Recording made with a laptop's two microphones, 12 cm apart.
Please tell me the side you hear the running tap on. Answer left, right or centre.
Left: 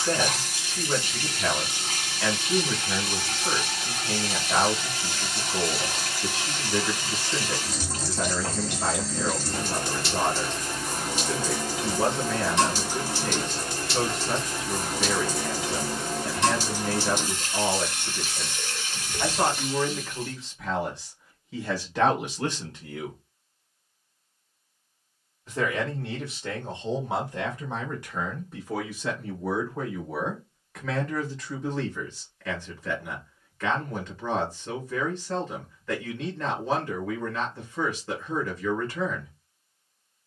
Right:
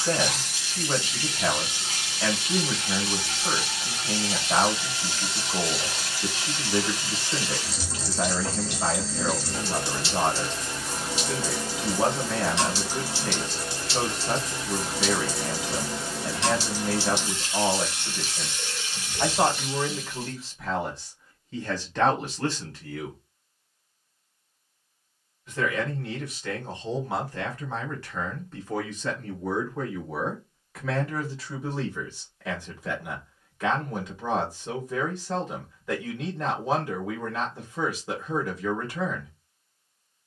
left.